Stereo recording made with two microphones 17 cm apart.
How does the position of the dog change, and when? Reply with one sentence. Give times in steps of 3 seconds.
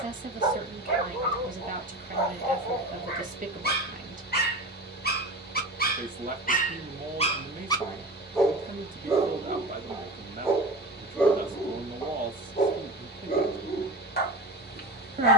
You can hear the dog on the left from 0 s, in the centre from 9 s and on the left from 12 s.